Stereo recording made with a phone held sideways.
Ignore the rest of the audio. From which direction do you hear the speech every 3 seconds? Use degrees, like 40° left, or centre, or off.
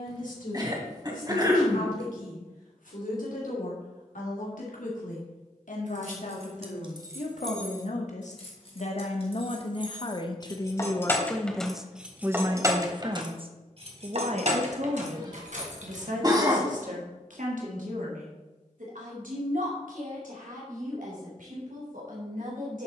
80° left, 70° left, 60° left, 30° left, 40° right, 70° right, 80° right, 80° right.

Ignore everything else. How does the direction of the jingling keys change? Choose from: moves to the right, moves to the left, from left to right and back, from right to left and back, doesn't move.
from right to left and back.